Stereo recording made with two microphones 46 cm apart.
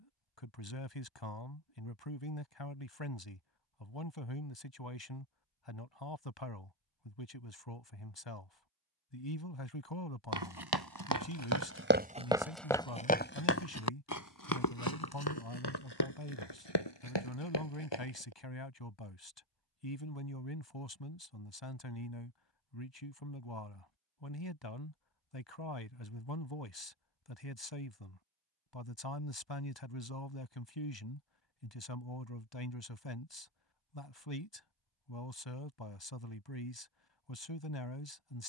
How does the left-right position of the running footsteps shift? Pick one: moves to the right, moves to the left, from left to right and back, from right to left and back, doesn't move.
moves to the left.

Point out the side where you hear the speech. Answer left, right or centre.
left.